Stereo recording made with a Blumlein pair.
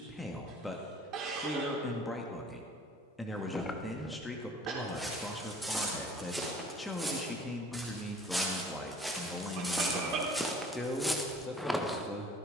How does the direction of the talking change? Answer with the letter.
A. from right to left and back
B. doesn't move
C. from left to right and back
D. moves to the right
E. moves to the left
B.